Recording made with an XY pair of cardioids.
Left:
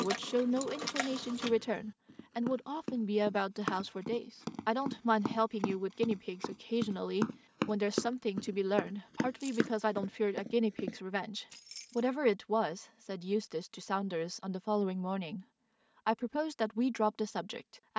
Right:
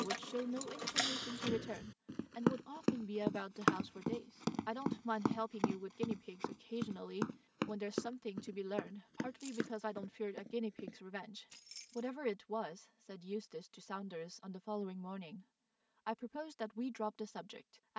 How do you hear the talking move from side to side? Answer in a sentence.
You can hear the talking stay put.